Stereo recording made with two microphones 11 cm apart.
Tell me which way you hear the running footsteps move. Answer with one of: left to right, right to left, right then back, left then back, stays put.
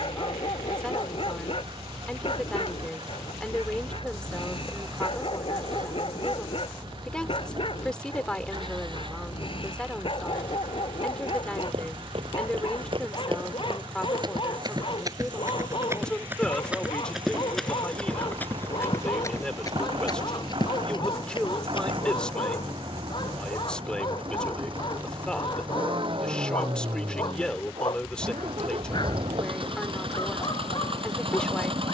right to left.